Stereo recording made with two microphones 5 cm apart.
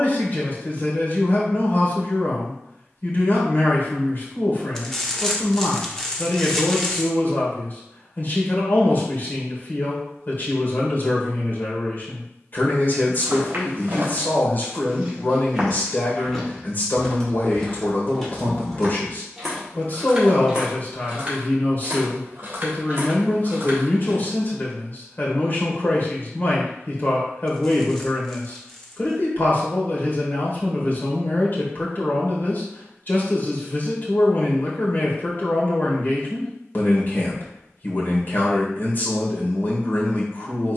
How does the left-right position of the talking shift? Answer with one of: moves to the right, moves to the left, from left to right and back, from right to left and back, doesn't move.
doesn't move.